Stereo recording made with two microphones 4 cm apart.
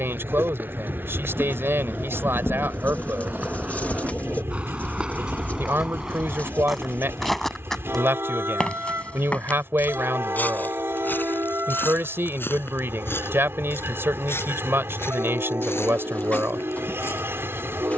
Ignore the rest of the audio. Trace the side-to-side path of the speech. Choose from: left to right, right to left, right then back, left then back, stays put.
stays put.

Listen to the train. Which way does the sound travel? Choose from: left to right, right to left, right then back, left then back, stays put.
stays put.